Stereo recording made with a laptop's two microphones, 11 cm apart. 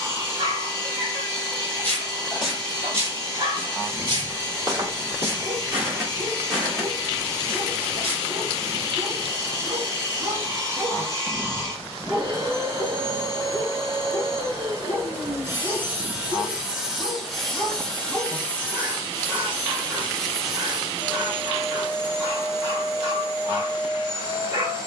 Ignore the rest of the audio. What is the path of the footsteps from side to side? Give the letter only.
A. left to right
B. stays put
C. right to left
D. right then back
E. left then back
D.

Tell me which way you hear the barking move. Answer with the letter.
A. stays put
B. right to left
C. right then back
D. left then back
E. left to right
D.